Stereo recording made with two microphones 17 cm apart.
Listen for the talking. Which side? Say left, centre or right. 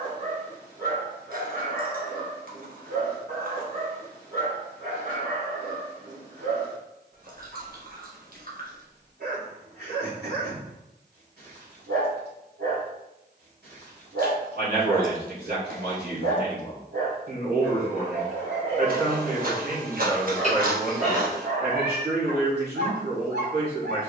right.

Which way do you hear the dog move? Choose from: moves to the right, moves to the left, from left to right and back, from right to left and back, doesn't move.
doesn't move.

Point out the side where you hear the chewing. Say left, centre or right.
right.